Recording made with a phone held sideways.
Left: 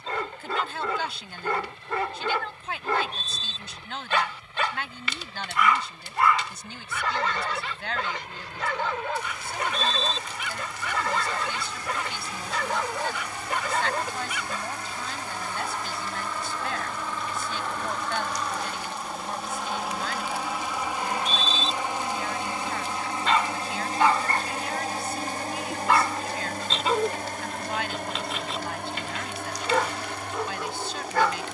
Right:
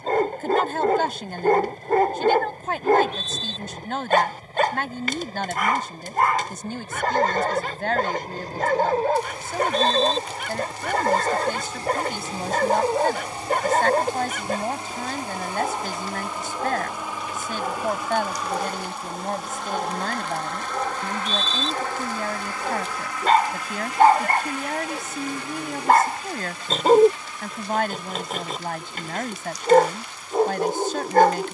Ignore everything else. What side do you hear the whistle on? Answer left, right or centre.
left.